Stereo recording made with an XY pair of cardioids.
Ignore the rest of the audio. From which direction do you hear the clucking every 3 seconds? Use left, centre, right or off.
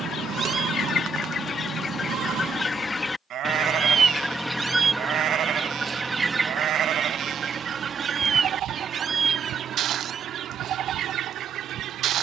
left, centre, right, right.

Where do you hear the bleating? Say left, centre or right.
right.